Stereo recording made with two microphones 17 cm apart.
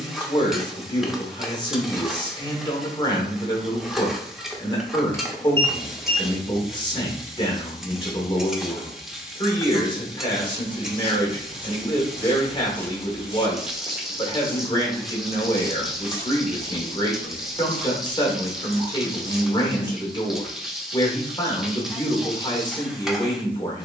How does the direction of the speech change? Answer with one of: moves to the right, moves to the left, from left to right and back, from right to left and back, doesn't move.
doesn't move.